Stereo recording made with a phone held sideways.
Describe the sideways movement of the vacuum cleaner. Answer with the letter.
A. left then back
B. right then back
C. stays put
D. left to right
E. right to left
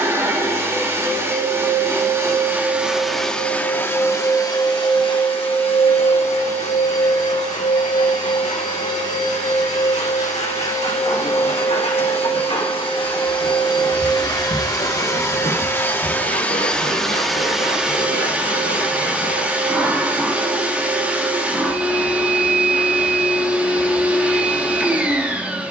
A.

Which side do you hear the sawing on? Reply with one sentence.
In this clip you hear the sawing on the left.